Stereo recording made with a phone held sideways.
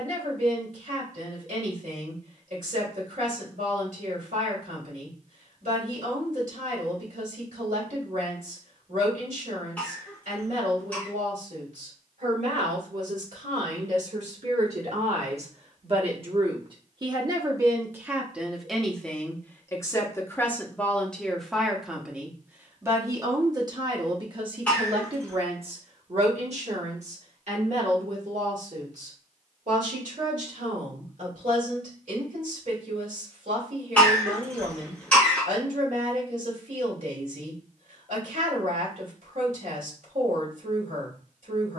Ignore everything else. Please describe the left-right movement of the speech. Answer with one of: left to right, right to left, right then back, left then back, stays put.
left then back.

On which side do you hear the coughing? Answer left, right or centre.
centre.